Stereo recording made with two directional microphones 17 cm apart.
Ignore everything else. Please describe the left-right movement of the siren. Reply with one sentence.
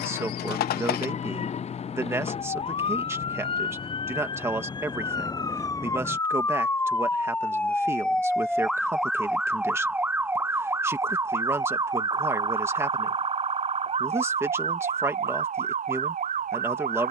In this clip you hear the siren go from the left side to the right.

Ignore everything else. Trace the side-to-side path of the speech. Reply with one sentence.
You can hear the speech stay put.